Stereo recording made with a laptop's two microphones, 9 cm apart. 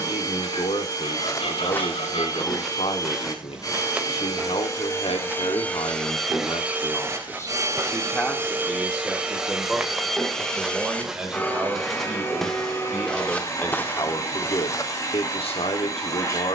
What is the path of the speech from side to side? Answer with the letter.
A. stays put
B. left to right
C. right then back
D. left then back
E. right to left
C.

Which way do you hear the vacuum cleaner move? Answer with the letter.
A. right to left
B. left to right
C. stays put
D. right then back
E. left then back
D.